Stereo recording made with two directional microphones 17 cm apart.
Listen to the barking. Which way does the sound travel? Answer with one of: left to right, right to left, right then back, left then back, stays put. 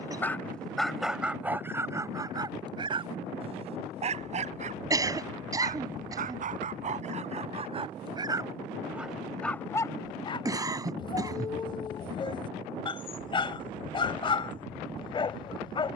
right then back.